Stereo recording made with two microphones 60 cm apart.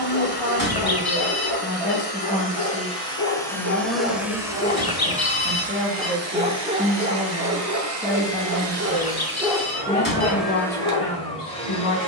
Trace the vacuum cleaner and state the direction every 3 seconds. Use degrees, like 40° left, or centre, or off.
20° left, 10° right, 40° right, centre.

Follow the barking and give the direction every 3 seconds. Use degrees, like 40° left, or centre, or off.
50° left, 20° left, 20° right, 20° left.